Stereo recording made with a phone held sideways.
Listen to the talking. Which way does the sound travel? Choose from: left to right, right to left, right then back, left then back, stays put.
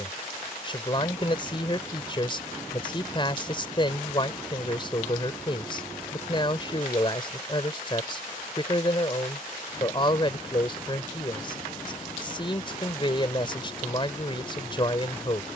stays put.